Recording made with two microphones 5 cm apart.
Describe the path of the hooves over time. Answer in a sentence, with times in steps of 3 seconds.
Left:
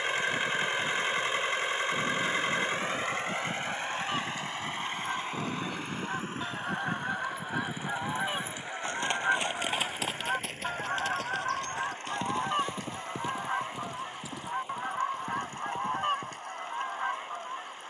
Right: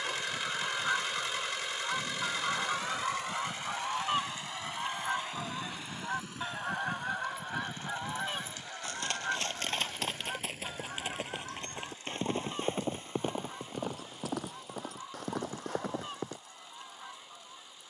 You can hear the hooves on the left from 0 s, in the centre from 9 s and on the right from 12 s.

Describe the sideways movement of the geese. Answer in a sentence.
In this clip you hear the geese go from the right side to the left.